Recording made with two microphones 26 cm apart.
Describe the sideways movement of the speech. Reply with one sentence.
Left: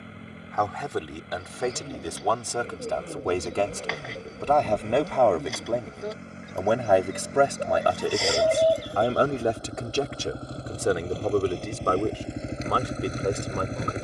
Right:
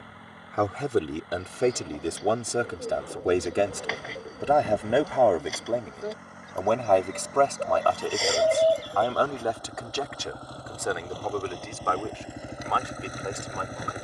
In this clip you hear the speech move from right to left.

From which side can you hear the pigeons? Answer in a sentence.
In this clip you hear the pigeons in the centre.